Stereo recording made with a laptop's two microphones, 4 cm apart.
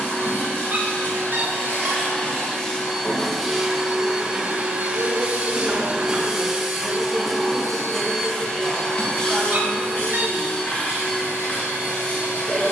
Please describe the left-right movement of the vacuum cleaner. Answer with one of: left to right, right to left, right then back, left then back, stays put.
right then back.